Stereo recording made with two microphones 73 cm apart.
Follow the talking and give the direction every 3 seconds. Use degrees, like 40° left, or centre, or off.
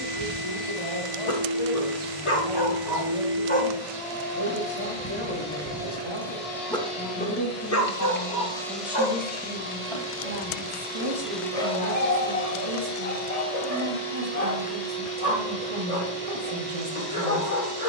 50° left, 40° left, 10° left, 30° right, 50° right, 50° right.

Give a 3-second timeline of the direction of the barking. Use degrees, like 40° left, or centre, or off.
50° left, 10° right, 20° left, 50° left, 60° left, 60° left.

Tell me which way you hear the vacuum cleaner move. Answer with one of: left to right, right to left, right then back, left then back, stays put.
right then back.